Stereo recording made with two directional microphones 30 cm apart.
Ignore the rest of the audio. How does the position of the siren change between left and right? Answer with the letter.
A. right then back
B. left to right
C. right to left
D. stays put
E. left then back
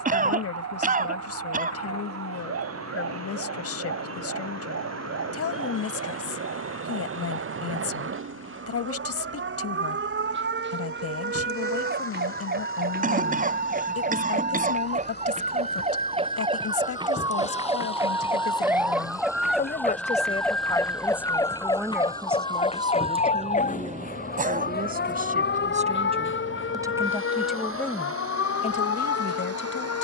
C.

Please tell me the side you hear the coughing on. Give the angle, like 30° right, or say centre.
30° right.